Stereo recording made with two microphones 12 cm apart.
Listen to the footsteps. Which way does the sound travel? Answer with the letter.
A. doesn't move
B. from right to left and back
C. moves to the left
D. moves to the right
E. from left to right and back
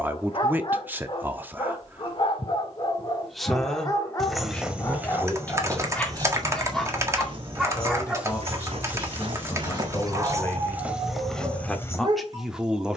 E.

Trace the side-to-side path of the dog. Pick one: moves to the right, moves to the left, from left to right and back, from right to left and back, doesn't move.
moves to the right.